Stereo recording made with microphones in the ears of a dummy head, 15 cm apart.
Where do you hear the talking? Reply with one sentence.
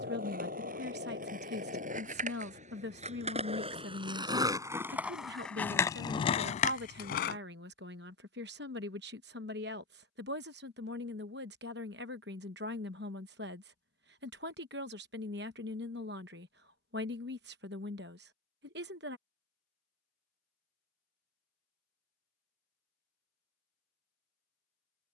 You can hear the talking on the right.